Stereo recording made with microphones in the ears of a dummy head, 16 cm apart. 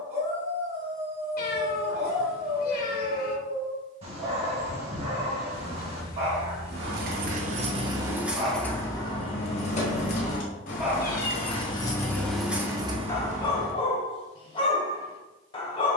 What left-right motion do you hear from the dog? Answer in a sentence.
In this clip you hear the dog travel towards the left.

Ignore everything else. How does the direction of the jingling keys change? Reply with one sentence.
In this clip you hear the jingling keys go left and come back.